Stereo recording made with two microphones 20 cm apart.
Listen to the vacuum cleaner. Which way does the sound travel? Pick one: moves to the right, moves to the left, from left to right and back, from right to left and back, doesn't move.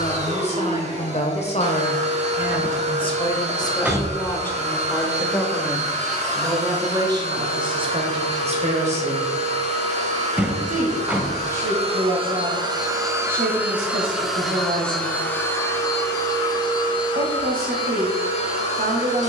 moves to the left.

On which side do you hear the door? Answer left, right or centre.
centre.